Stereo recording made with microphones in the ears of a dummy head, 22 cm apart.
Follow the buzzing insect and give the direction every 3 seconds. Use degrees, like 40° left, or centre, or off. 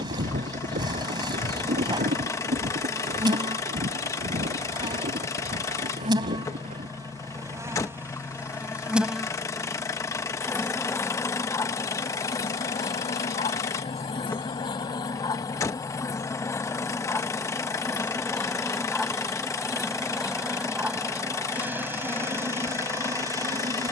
20° right, 20° right, 10° right, 10° left, 20° left, 10° left, centre, 10° right.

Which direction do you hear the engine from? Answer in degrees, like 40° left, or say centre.
10° left.